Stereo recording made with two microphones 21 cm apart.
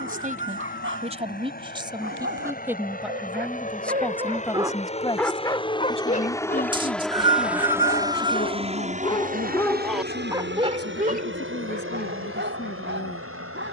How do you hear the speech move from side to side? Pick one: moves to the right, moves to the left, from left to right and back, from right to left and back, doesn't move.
moves to the left.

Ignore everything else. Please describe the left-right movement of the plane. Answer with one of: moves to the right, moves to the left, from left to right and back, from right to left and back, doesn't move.
moves to the right.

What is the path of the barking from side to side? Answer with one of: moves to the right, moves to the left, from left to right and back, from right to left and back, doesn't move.
from right to left and back.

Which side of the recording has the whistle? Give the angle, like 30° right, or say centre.
20° right.